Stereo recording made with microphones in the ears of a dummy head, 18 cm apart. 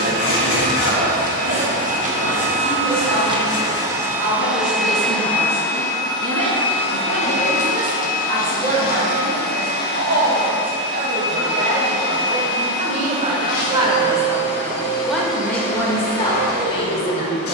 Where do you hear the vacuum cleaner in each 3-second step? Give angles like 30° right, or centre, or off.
40° right, centre, 40° left, 60° left, 70° left, 70° left.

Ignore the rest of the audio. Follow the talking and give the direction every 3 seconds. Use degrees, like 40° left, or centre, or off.
70° right, 60° right, 60° right, 50° right, 30° right, 20° left.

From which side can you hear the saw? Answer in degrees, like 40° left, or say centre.
60° left.